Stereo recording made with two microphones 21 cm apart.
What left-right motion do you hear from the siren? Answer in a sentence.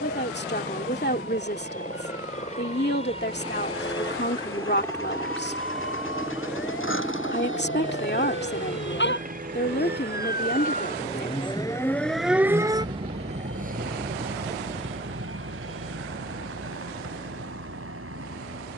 You can hear the siren move to the right.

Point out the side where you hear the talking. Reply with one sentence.
You can hear the talking on the left.